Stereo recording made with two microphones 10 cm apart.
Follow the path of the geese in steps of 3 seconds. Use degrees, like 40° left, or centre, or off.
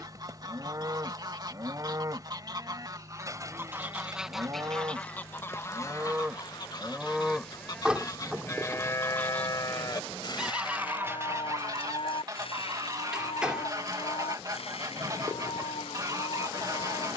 40° right, centre, 40° left, 10° right, 30° right, 30° right.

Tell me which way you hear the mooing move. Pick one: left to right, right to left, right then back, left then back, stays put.
right to left.